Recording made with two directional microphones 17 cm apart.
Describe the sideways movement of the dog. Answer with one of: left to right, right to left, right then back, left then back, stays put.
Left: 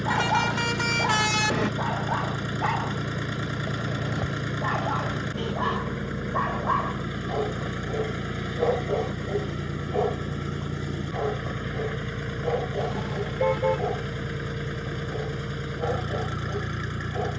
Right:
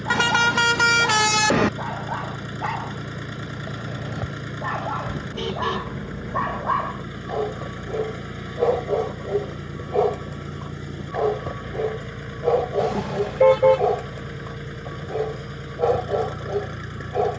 left to right.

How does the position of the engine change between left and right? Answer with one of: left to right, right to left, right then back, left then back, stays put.
stays put.